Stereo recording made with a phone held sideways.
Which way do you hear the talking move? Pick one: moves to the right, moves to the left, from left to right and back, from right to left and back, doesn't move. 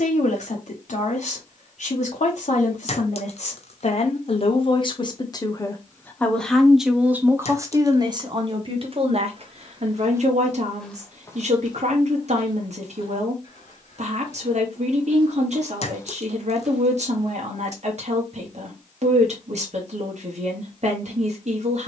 moves to the right.